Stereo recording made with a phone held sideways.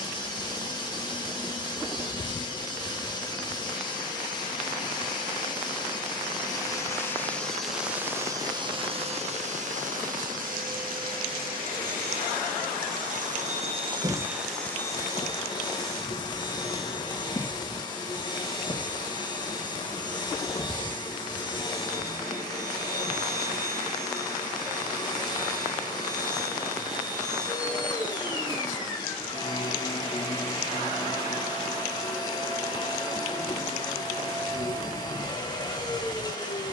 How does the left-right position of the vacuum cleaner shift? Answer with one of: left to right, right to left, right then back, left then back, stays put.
right then back.